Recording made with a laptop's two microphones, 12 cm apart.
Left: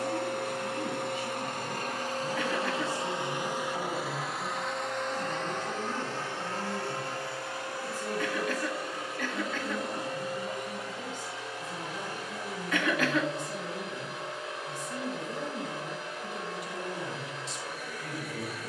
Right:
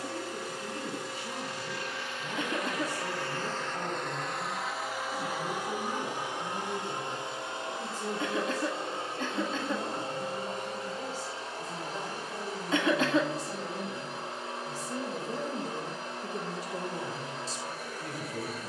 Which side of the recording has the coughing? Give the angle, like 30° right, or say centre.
30° right.